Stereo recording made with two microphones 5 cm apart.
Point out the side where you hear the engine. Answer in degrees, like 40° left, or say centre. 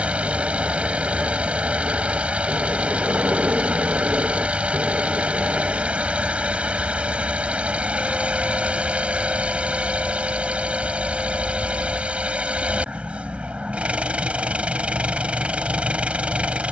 30° right.